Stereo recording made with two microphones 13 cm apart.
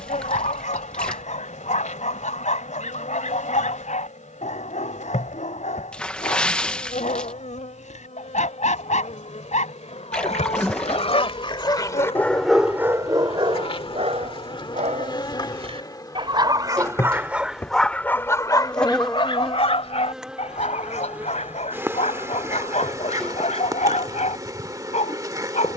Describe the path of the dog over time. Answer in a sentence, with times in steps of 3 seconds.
In this clip you hear the dog on the left from 0 s, on the right from 12 s and on the left from 18 s.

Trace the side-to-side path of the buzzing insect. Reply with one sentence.
In this clip you hear the buzzing insect travel towards the right.